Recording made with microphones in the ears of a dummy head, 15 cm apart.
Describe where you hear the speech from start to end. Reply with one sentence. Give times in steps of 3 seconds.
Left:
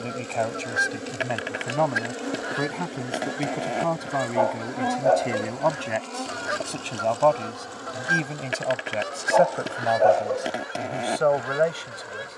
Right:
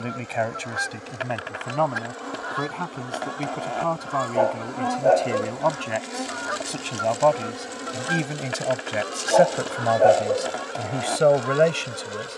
You can hear the speech in the centre from 0 s and on the right from 9 s.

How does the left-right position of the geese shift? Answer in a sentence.
You can hear the geese stay in one place.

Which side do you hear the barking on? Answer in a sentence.
You can hear the barking on the right.